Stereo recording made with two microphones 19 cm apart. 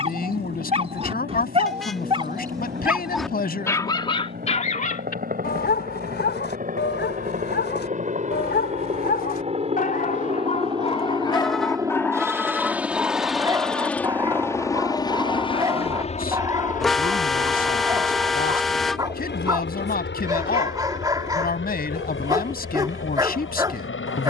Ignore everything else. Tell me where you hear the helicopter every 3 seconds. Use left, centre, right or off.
right, right, right, right, centre, left, left, left.